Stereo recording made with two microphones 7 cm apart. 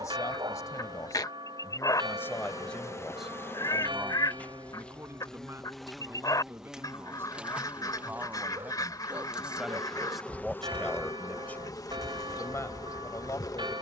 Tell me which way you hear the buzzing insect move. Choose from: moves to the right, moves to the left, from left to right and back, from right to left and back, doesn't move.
from left to right and back.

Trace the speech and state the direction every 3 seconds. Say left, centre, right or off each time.
left, right, right, centre, left.